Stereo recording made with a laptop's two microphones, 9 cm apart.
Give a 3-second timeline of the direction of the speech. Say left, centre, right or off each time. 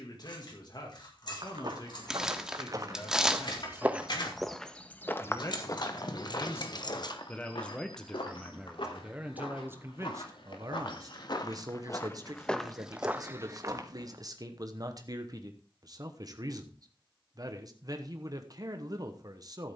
left, left, centre, right, right, right, right.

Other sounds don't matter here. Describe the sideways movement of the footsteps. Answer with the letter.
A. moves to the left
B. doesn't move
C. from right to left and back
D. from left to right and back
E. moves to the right
C.